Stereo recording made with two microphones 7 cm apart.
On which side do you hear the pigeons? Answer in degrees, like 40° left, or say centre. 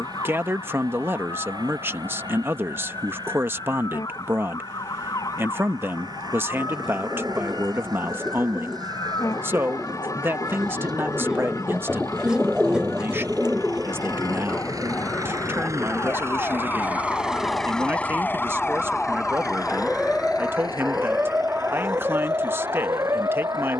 10° right.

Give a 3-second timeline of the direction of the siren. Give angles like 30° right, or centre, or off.
60° left, 60° left, 60° left, 50° left, 50° left, 30° left, centre, 40° right.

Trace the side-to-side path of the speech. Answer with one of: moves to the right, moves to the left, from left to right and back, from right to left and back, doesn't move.
doesn't move.